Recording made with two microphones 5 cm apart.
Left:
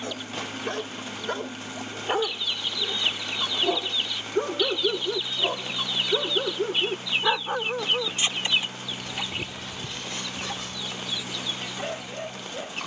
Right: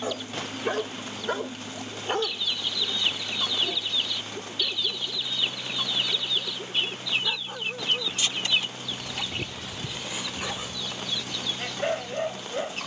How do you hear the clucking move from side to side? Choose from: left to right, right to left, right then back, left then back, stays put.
stays put.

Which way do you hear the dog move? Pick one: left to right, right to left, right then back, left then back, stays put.
left then back.